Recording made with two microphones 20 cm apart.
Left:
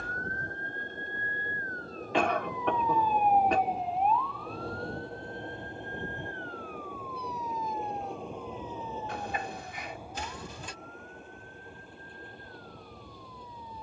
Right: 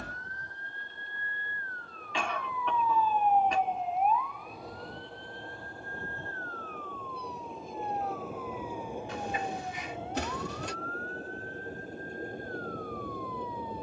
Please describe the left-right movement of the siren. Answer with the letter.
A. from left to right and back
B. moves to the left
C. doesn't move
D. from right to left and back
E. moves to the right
E.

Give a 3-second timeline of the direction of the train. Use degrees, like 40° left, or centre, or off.
40° left, 30° left, centre, 30° right, 50° right.